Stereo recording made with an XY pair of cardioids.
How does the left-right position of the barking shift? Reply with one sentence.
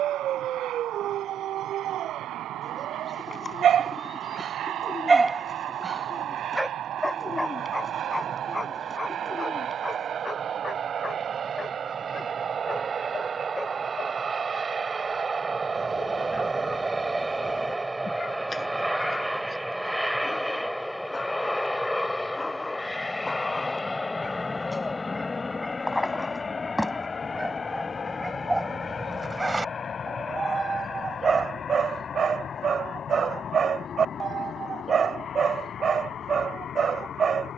You can hear the barking go left and come back.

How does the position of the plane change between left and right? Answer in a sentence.
You can hear the plane go from the right side to the left.